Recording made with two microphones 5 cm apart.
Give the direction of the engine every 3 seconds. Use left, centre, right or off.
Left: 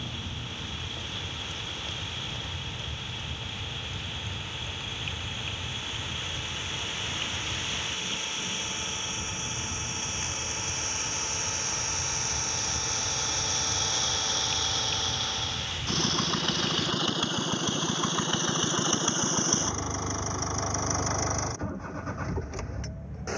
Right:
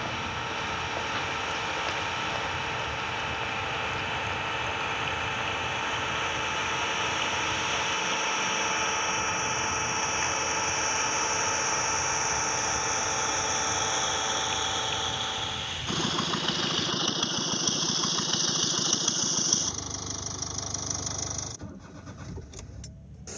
right, right, right, right, right, centre, left, left.